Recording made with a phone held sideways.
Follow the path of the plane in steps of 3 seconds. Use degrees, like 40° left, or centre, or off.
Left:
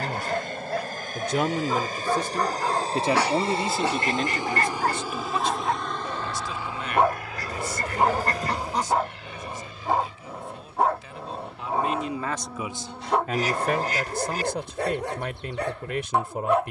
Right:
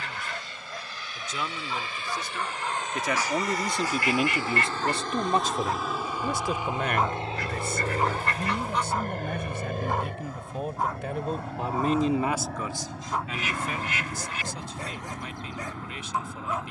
50° left, 20° left, 30° right, 60° right, 70° right, 70° right.